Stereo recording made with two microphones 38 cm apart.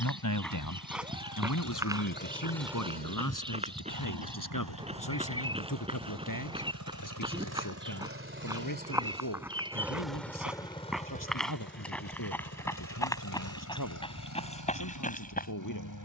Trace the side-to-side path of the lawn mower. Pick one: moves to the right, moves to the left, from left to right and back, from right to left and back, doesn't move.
from left to right and back.